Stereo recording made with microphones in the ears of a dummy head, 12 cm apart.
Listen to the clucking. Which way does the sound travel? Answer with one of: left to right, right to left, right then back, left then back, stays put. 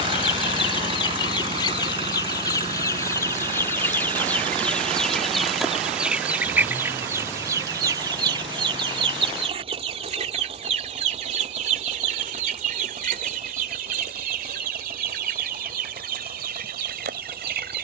left to right.